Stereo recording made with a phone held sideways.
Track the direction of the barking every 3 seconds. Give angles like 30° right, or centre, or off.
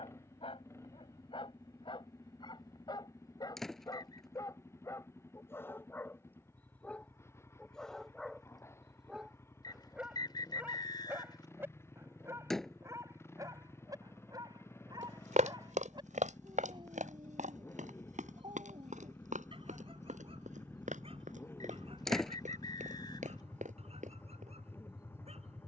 40° left, 20° left, 10° left, 10° right, 20° right, 30° right, 40° right, 50° right, 50° right.